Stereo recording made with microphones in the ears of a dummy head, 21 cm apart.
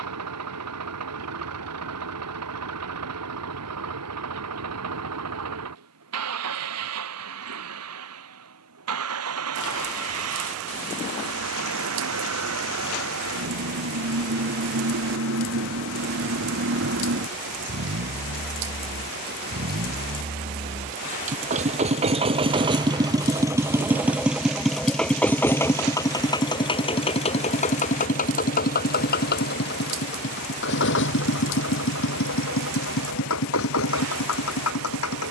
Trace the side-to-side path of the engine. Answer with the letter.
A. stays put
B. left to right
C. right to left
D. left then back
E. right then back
C.